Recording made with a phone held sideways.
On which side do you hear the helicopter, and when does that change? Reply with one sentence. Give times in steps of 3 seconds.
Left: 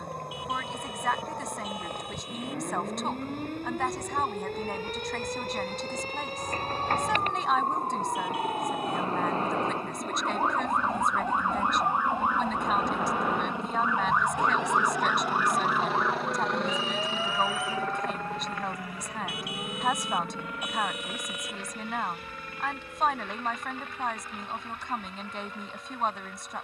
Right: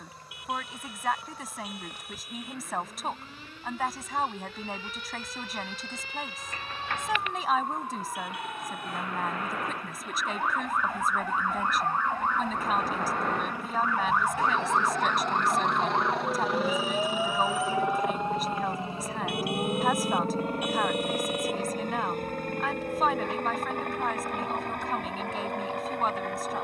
You can hear the helicopter on the left from 0 s, in the centre from 15 s and on the right from 18 s.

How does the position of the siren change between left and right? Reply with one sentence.
You can hear the siren travel towards the right.